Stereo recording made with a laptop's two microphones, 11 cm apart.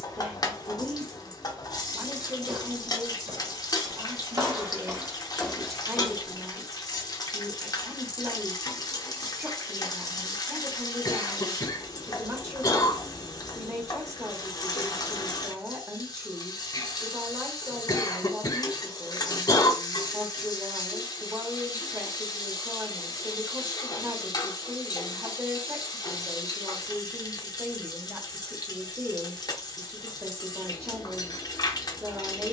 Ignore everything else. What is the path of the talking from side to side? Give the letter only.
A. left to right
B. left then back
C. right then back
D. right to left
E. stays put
E.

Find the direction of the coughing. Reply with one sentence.
You can hear the coughing on the left.